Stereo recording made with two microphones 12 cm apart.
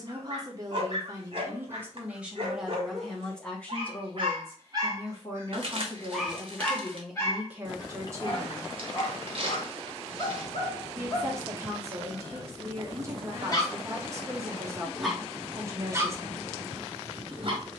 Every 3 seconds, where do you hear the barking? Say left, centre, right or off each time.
right, right, left, left, left, right.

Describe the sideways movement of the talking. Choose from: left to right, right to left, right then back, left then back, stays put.
left then back.